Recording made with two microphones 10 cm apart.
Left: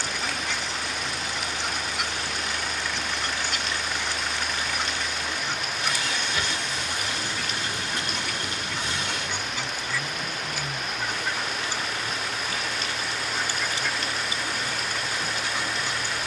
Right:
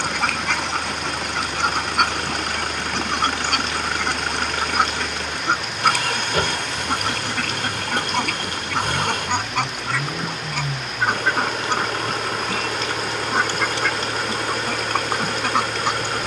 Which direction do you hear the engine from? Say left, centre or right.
right.